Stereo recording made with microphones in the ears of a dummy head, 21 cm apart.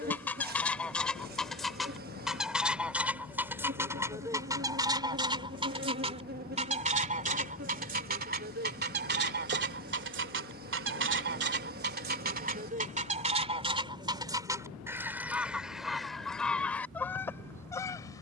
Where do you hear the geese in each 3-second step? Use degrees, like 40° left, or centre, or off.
centre, 20° right, 40° right, 50° right, 30° right, centre.